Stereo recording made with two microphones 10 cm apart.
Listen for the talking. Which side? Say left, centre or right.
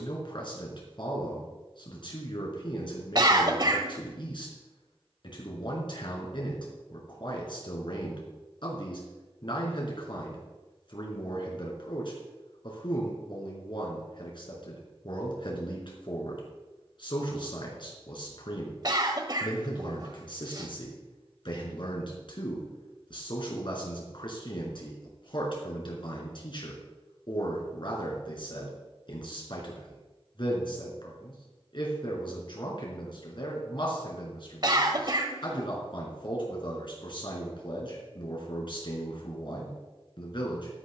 left.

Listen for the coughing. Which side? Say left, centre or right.
right.